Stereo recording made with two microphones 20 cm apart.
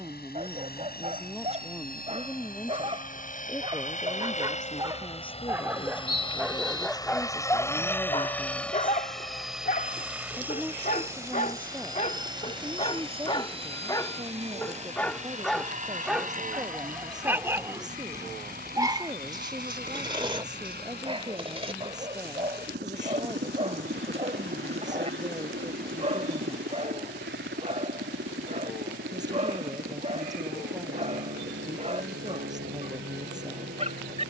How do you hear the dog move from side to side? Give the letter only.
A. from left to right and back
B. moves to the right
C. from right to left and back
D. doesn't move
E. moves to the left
C.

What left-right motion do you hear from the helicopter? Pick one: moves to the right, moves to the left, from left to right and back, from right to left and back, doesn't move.
moves to the right.